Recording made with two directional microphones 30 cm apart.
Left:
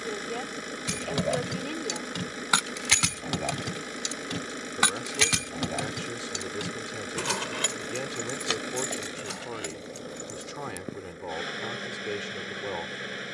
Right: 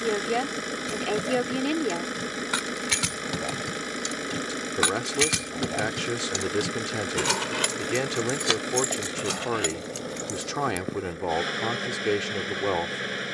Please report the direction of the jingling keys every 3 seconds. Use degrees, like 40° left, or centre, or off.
50° left, 10° left, 40° right, 60° right, off.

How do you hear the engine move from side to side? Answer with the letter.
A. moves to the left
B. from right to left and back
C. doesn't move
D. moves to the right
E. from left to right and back
C.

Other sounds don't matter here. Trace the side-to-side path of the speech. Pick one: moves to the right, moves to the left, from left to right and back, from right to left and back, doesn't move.
doesn't move.